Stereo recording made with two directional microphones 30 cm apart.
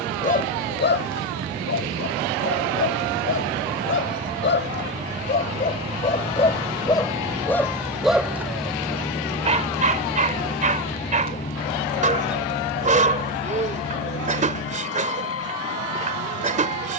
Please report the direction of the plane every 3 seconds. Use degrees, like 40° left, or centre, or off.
40° right, 30° right, 10° right, 20° left, 40° left, 50° left.